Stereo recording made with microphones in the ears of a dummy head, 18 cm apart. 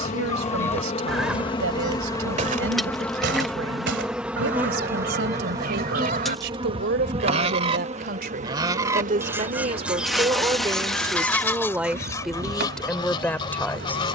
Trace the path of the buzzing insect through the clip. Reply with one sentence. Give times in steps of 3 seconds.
In this clip you hear the buzzing insect on the left from 0 s, in the centre from 3 s and on the right from 6 s.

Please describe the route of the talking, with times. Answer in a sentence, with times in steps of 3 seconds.
You can hear the talking on the right from 0 s and in the centre from 12 s.